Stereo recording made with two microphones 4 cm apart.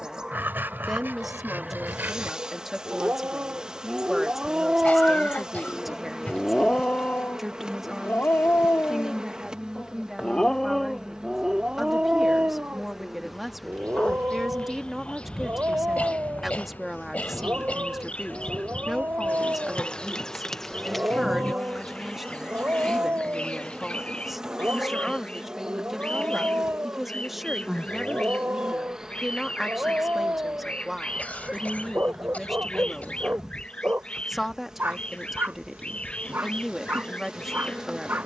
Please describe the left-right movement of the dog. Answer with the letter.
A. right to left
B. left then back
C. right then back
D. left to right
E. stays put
B.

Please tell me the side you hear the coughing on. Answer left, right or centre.
left.